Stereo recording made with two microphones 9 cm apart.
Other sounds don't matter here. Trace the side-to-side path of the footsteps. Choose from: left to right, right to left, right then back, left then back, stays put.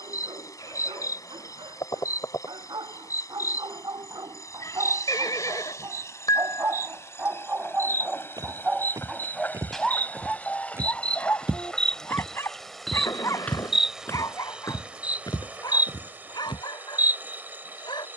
right to left.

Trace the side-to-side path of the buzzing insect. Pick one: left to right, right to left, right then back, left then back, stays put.
left to right.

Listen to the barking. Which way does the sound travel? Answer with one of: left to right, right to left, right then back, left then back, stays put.
right to left.